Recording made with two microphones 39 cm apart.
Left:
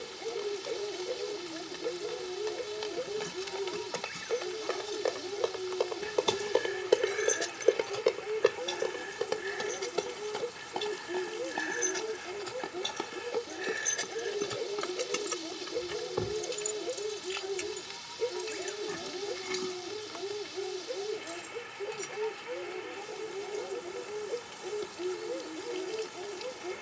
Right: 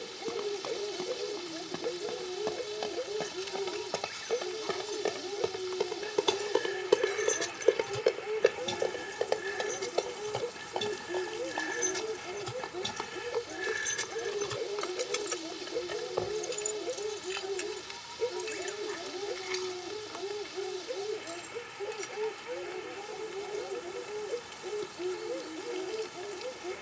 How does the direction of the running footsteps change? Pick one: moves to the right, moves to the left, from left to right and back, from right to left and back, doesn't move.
moves to the left.